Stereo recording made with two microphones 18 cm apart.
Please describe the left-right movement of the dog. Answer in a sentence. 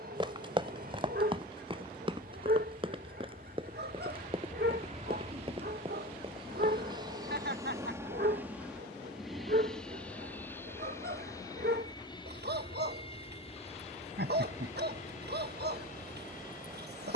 You can hear the dog stay put.